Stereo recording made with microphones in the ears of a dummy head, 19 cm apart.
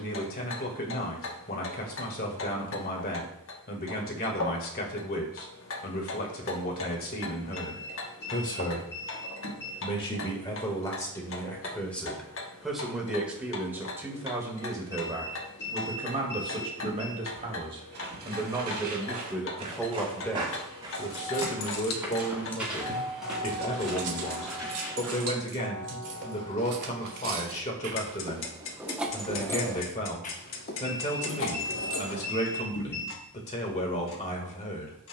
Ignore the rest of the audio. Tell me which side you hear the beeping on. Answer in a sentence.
You can hear the beeping on the left.